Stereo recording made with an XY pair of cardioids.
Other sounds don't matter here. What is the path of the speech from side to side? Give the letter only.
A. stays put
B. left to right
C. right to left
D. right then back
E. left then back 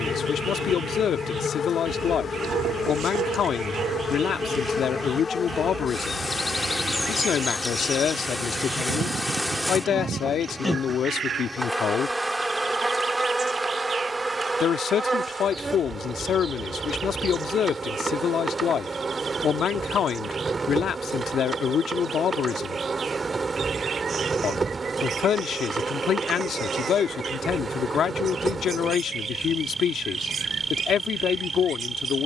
A.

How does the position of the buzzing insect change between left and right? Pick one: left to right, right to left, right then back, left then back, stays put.
left to right.